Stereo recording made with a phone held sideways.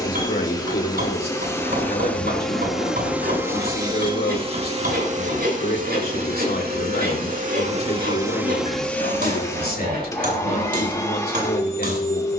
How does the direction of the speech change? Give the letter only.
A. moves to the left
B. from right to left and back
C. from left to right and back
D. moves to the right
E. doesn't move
E.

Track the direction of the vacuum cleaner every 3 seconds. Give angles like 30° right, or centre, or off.
10° left, 40° right, 40° right, 20° left.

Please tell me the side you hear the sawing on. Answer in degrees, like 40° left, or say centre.
80° right.